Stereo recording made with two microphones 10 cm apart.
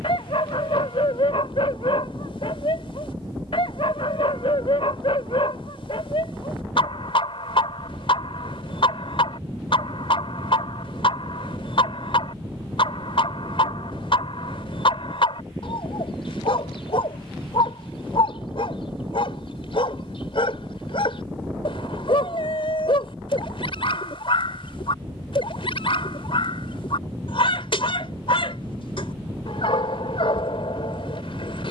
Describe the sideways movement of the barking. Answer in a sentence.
You can hear the barking stay in one place.